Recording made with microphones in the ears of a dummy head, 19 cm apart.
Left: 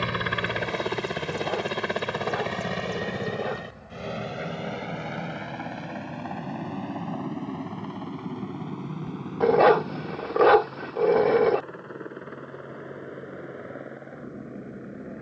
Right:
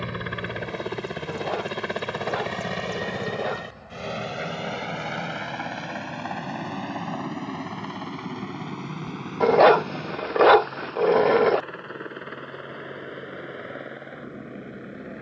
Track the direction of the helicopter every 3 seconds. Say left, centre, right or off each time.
centre, right, right, right, right.